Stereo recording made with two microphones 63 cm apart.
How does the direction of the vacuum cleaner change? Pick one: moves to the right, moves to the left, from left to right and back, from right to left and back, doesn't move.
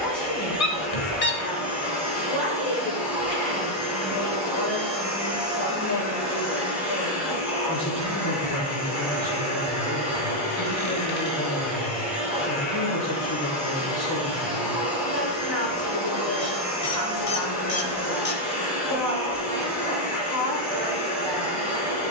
doesn't move.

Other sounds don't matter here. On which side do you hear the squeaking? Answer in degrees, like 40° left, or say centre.
60° left.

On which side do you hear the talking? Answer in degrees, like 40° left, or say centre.
40° left.